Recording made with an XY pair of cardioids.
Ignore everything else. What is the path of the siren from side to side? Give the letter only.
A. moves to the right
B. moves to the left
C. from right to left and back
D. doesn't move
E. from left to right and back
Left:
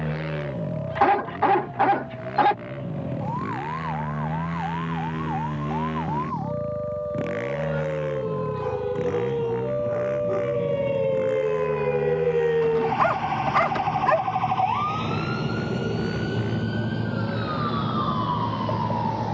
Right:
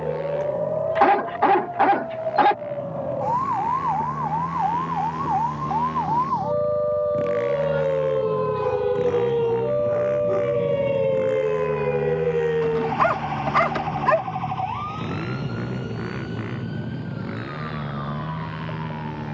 B.